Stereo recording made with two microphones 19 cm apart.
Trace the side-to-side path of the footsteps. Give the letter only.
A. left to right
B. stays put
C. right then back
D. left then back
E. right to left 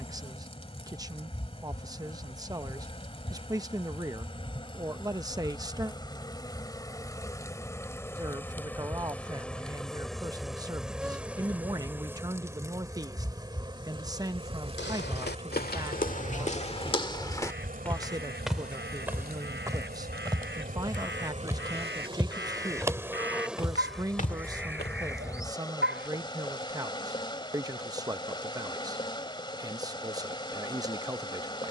C.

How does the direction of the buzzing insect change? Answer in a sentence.
You can hear the buzzing insect go right and come back.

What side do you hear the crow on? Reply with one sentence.
In this clip you hear the crow on the right.